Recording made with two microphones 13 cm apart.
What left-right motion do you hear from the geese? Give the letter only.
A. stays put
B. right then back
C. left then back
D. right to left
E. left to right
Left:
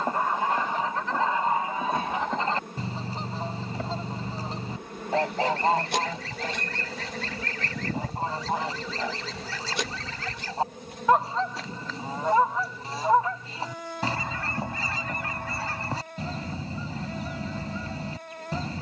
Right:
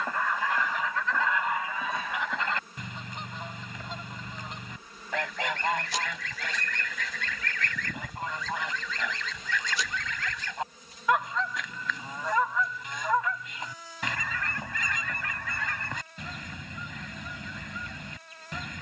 A.